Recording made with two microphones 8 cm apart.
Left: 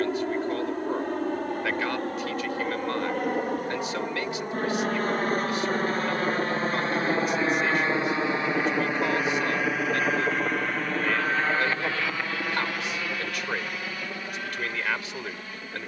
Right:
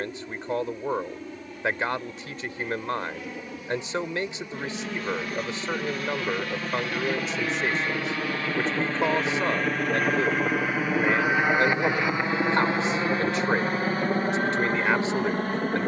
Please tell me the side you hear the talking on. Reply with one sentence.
In this clip you hear the talking on the right.